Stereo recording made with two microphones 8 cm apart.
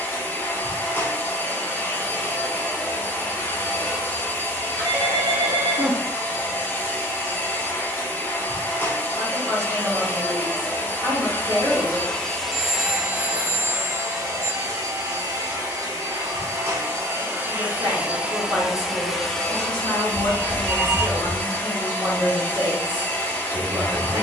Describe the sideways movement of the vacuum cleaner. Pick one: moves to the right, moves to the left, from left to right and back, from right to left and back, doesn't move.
from left to right and back.